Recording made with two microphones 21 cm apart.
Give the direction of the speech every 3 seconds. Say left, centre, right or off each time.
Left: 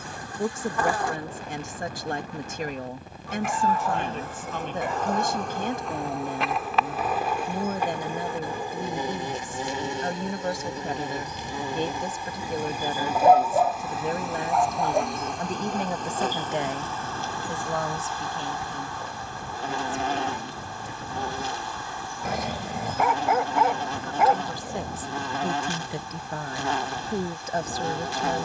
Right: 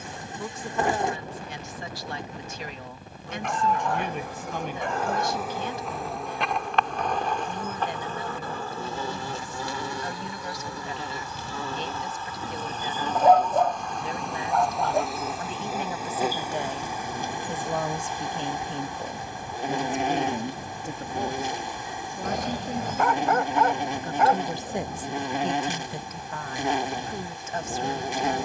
left, left, left, left, left, left, right, right, centre, left.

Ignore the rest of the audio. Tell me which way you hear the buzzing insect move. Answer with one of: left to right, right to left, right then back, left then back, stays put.
left then back.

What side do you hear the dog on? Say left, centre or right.
centre.